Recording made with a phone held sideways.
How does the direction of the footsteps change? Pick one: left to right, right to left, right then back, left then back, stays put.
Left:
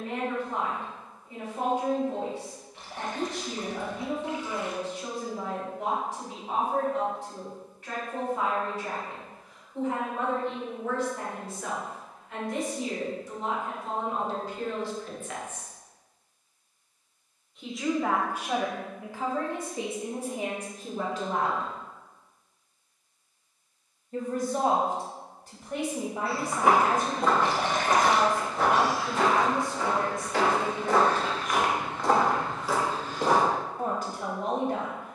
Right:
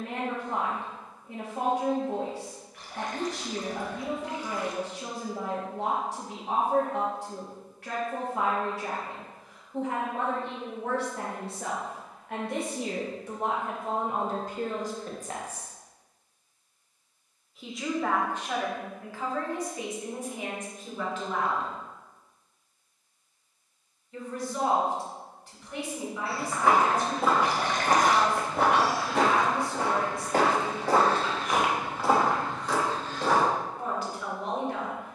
right then back.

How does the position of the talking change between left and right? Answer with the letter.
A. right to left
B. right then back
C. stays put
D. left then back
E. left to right
A.